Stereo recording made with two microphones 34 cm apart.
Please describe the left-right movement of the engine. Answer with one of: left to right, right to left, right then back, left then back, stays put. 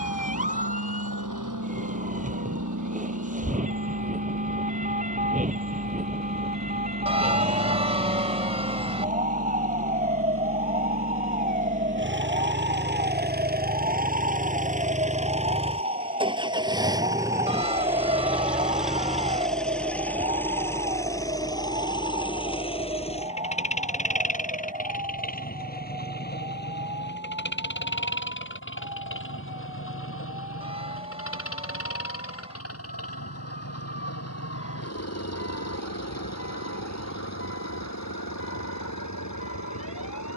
right to left.